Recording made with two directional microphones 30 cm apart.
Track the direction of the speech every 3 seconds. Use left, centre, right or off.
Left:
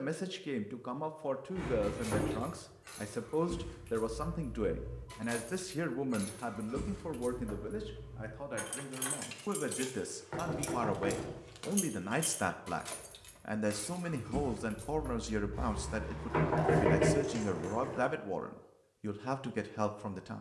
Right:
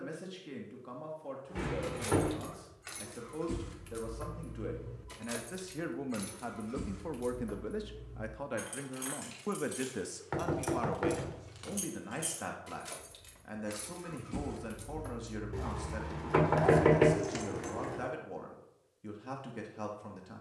left, left, centre, centre, left, left, left.